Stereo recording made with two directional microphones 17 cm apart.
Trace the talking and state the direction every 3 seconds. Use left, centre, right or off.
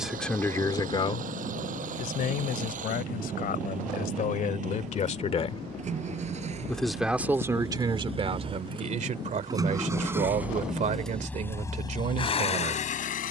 left, left, right, right, right.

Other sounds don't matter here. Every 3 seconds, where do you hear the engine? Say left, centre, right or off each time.
right, right, right, centre, left.